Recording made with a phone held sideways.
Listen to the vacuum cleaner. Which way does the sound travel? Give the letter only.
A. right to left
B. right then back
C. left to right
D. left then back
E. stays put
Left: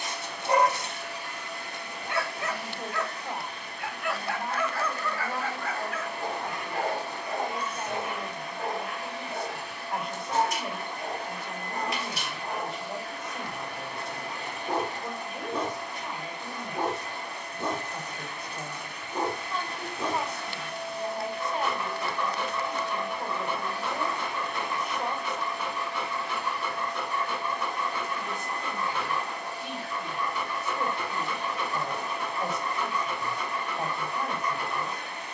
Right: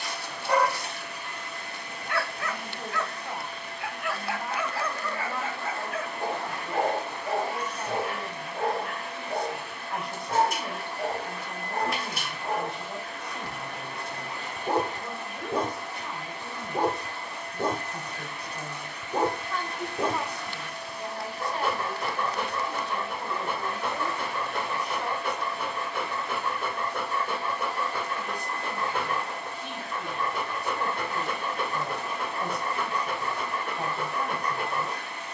E.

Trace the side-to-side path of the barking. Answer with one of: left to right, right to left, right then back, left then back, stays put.
left to right.